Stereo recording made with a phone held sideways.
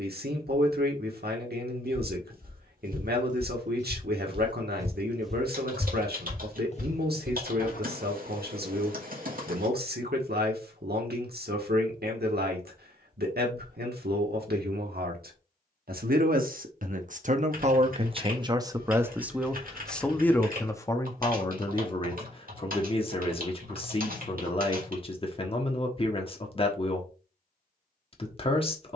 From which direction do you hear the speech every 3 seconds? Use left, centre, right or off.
right, right, right, right, right, right, centre, left, left, left.